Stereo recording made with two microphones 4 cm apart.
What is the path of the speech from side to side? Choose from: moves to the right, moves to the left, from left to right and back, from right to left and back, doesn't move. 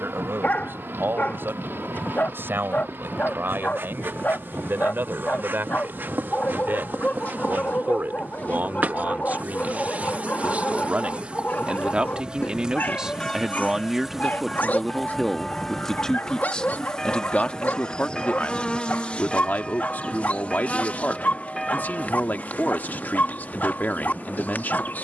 moves to the left.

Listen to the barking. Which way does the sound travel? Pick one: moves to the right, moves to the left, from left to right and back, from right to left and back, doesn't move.
doesn't move.